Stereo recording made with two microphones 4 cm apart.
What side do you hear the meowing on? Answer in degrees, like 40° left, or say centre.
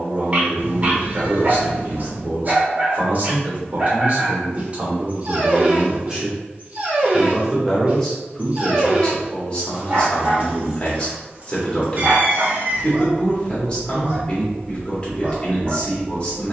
50° right.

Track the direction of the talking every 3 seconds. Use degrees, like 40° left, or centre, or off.
50° right, 30° right, centre, 20° left, 20° left, 20° left.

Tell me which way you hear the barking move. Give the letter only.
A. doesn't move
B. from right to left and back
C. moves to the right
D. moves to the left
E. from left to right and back
A.